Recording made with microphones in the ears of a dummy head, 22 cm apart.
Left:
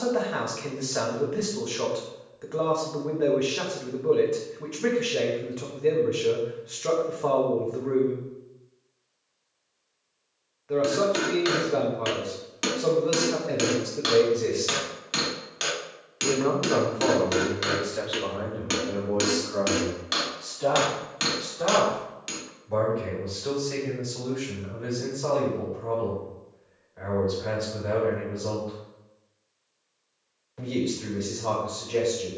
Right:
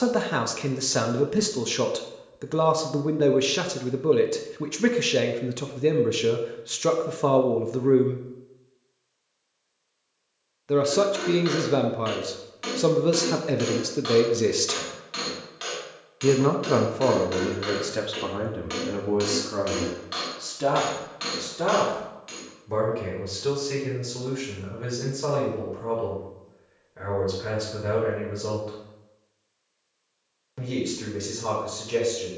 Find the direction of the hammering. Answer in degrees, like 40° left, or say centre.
60° left.